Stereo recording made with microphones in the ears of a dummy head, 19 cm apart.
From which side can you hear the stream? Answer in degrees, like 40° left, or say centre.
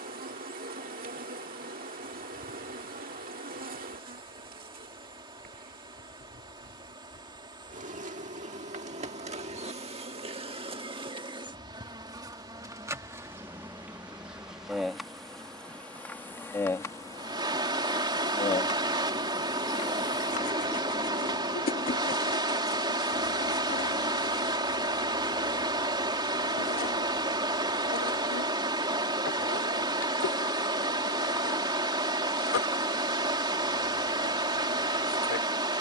20° right.